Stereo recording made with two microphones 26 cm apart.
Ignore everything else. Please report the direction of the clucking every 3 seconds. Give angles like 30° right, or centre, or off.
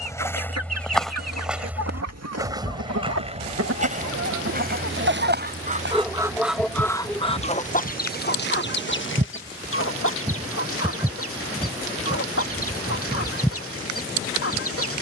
80° right, 50° right, 20° left, 60° left, 60° left.